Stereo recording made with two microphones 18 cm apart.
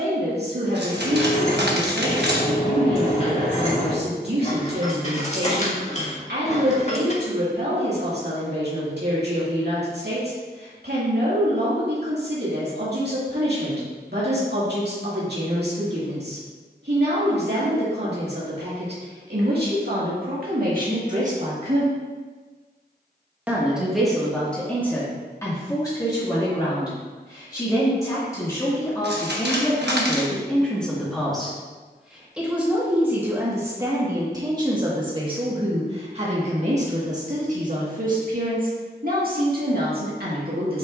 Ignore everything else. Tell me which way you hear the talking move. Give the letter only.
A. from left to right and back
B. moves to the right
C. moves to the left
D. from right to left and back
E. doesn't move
D.